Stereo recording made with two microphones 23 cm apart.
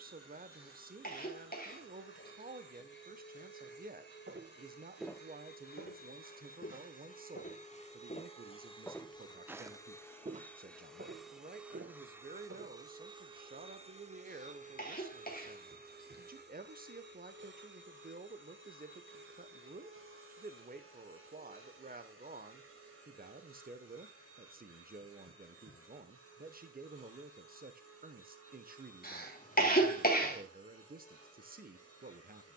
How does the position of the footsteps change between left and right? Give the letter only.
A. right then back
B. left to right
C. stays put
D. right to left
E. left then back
E.